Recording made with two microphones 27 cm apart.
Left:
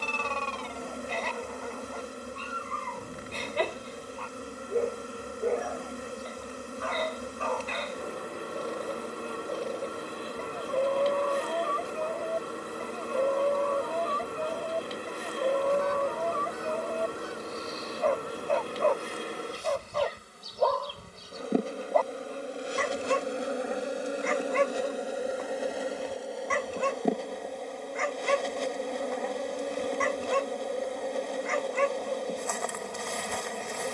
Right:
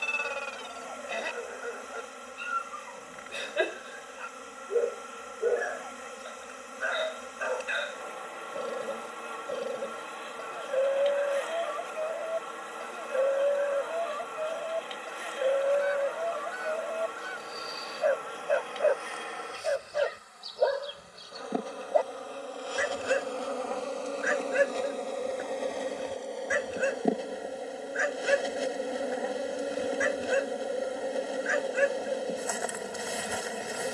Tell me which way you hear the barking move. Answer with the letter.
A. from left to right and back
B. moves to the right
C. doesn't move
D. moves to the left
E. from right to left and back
C.